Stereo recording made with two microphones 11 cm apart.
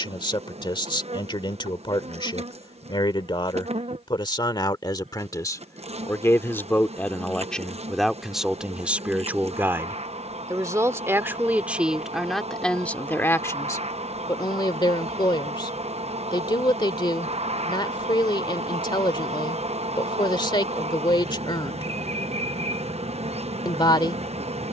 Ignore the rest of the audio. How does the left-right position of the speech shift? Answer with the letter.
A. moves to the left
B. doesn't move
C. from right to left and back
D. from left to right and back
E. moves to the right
D.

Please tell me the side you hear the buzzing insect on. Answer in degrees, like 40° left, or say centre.
80° right.